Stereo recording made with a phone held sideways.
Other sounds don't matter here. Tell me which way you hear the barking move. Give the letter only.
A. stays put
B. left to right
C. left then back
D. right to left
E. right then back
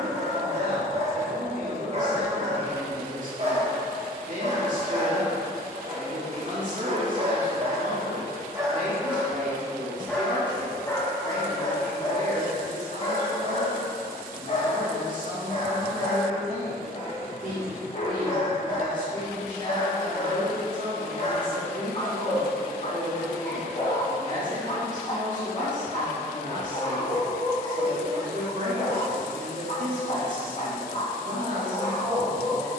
D.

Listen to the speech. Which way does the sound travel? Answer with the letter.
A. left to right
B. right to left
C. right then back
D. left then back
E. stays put
E.